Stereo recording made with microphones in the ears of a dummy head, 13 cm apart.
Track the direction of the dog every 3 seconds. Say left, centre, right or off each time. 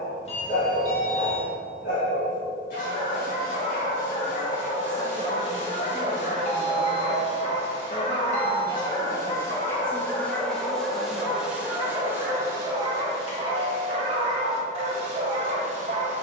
left, left, left, centre, right, right.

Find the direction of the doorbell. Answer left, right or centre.
left.